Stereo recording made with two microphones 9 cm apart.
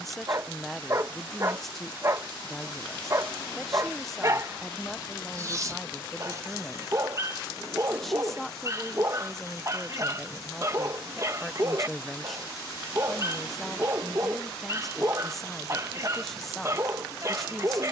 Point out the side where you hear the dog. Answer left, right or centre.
right.